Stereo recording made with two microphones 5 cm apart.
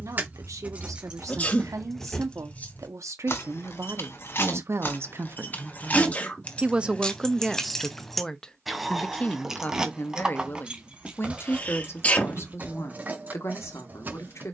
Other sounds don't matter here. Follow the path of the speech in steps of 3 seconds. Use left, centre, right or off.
right, right, centre, left, left.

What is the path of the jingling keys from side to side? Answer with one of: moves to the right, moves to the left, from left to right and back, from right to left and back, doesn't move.
from right to left and back.